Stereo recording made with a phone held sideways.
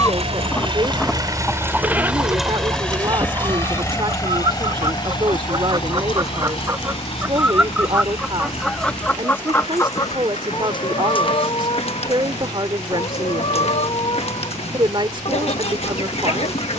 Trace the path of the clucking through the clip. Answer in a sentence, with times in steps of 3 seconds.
In this clip you hear the clucking in the centre from 0 s, on the right from 3 s, in the centre from 6 s and on the left from 9 s.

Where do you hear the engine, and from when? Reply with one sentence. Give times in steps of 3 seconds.
In this clip you hear the engine on the right from 0 s and on the left from 3 s.